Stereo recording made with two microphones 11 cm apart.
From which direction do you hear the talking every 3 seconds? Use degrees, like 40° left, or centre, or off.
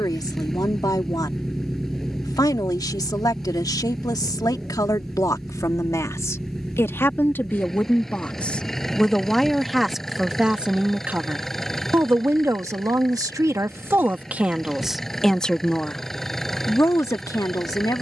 40° left, 30° left, 20° left, 10° right, 20° right, 20° left.